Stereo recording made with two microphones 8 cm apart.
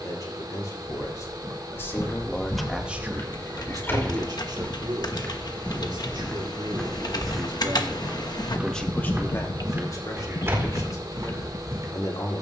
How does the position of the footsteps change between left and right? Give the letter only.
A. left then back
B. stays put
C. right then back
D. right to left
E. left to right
E.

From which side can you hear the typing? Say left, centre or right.
left.